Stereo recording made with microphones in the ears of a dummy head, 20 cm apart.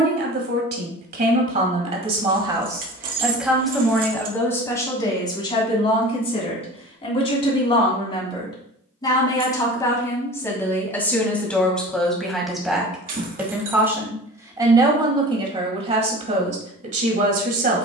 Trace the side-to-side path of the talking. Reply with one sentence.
In this clip you hear the talking go left and come back.